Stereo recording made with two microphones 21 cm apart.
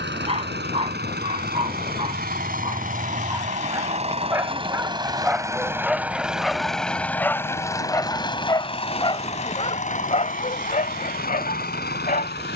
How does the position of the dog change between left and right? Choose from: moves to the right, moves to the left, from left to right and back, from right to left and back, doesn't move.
moves to the left.